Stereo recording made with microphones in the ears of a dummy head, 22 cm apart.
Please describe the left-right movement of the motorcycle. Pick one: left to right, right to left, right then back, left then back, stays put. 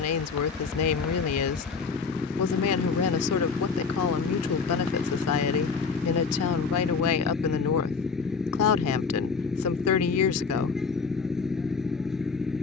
stays put.